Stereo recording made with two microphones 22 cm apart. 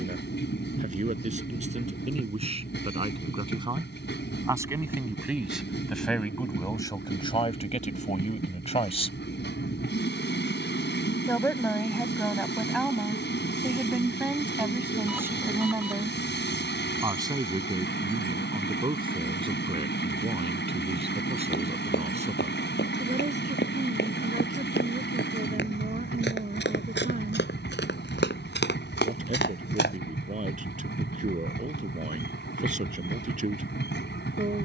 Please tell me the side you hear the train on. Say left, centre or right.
left.